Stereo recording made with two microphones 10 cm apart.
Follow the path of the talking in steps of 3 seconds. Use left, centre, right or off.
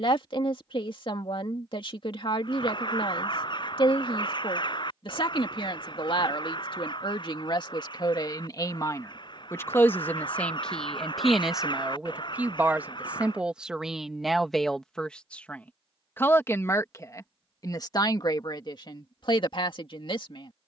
left, left, left, centre, centre, left, left.